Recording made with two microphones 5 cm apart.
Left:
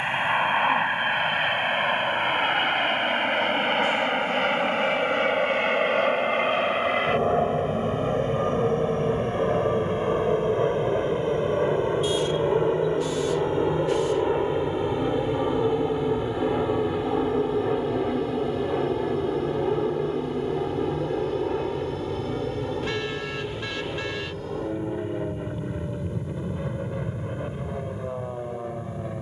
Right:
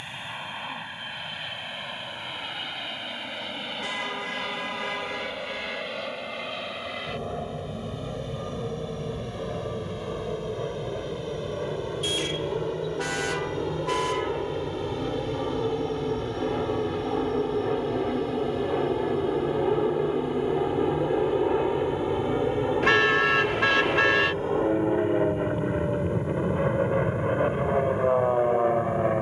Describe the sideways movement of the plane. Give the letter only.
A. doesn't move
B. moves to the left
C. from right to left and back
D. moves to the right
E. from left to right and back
D.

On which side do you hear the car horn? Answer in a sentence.
You can hear the car horn on the right.